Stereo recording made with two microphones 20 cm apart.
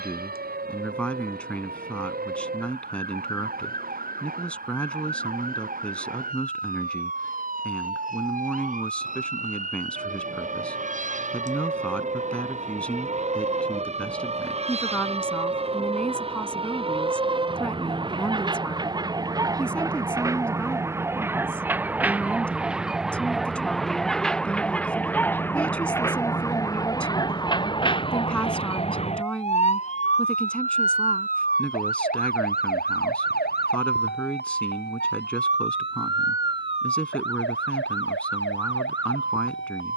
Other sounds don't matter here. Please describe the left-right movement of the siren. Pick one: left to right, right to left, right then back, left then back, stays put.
right to left.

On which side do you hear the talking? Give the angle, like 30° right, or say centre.
10° left.